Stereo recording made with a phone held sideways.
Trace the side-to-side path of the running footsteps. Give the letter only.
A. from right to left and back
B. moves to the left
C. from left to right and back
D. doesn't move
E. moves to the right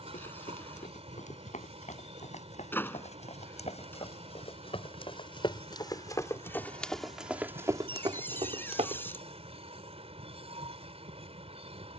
E.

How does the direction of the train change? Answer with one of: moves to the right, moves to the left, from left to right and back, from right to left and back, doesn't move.
doesn't move.